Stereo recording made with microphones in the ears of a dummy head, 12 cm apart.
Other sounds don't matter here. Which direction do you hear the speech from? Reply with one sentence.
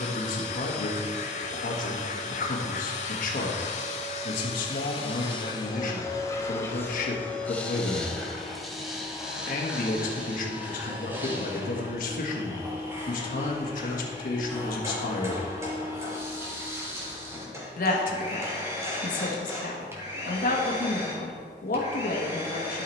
In this clip you hear the speech on the left.